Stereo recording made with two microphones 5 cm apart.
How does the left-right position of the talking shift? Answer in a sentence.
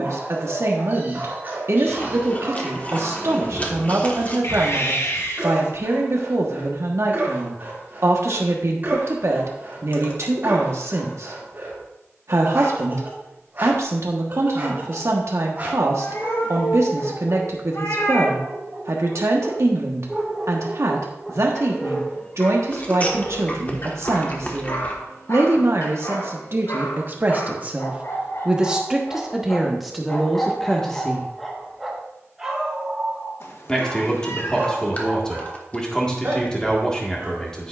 In this clip you hear the talking go from the right side to the left.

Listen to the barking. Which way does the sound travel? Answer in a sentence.
In this clip you hear the barking move from right to left and back again.